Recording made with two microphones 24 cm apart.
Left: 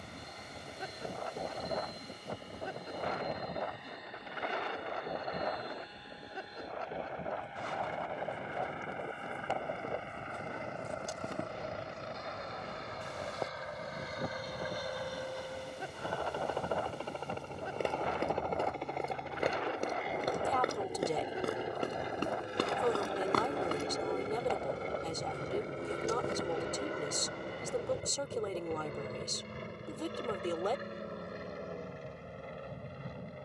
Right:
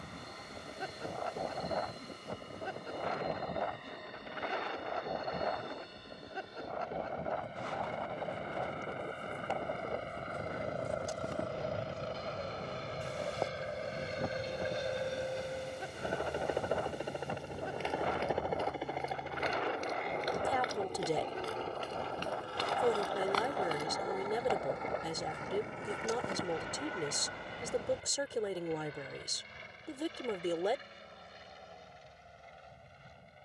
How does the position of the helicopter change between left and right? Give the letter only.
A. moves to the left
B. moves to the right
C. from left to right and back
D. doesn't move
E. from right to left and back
A.